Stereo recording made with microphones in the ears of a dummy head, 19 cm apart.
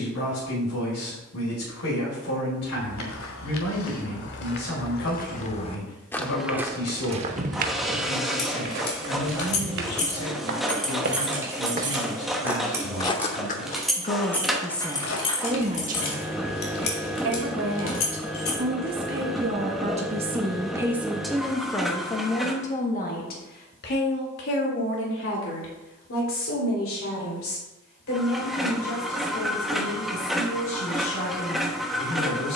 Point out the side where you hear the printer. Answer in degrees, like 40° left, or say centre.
centre.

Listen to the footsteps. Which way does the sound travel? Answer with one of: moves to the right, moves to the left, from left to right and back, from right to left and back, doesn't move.
from left to right and back.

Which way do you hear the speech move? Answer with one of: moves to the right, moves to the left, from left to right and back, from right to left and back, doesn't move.
from left to right and back.